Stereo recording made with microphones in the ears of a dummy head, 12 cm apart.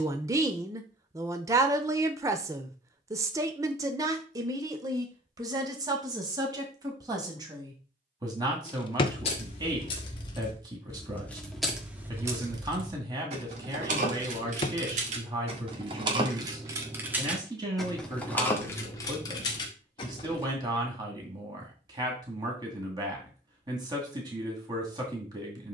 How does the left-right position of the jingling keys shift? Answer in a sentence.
You can hear the jingling keys move from left to right and back again.